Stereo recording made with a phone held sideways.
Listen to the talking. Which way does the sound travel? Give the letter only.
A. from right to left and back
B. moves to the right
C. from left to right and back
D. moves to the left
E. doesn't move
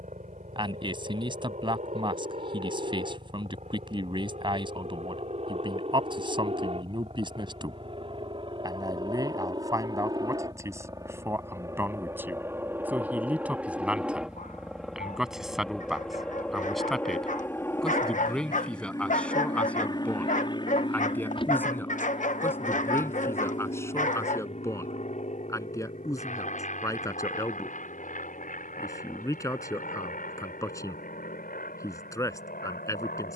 D.